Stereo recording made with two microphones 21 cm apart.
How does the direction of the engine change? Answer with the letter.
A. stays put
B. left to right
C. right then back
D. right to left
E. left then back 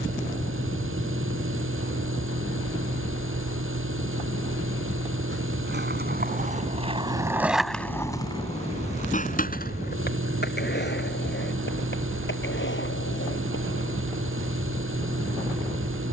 A.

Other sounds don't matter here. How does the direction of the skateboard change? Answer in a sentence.
In this clip you hear the skateboard travel towards the left.